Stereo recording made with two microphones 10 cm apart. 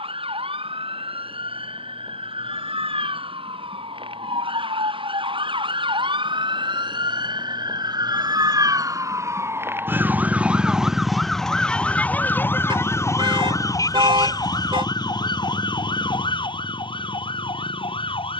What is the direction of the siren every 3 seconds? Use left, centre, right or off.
right, right, right, centre, left, left.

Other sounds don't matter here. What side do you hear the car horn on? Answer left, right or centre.
right.